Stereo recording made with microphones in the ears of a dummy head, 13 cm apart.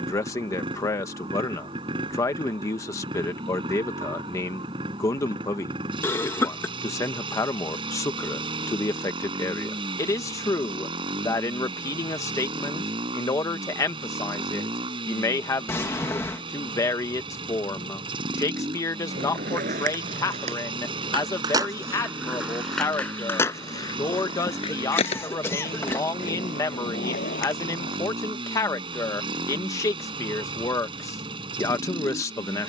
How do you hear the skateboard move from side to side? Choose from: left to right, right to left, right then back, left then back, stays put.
right to left.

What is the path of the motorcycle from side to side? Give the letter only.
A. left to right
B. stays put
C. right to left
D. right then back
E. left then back
B.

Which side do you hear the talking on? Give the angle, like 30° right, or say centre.
20° left.